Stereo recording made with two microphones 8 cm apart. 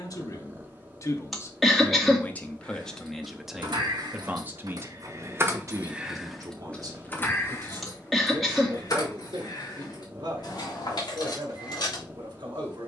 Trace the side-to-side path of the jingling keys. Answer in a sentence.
You can hear the jingling keys move to the left.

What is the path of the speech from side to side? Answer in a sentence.
In this clip you hear the speech go from the left side to the right.